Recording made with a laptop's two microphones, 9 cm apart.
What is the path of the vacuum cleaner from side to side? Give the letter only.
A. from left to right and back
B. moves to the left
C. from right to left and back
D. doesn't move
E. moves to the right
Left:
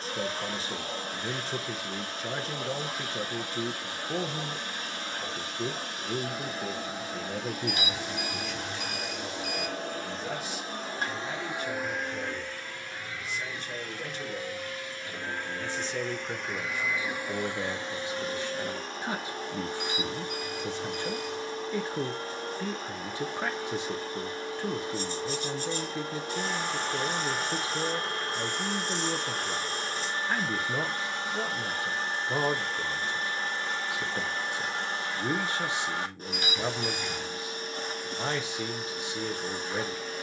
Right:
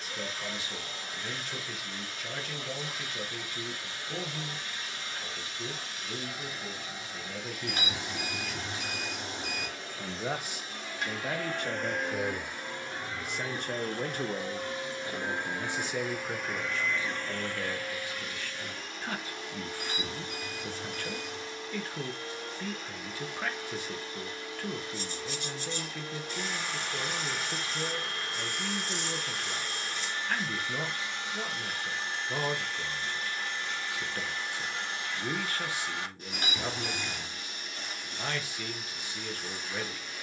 A.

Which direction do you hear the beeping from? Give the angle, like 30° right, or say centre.
40° right.